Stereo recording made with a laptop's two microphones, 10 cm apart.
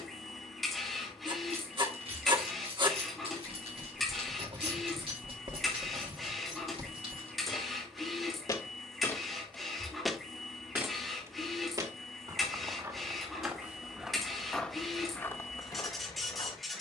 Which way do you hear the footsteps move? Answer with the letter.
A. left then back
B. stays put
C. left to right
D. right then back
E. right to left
D.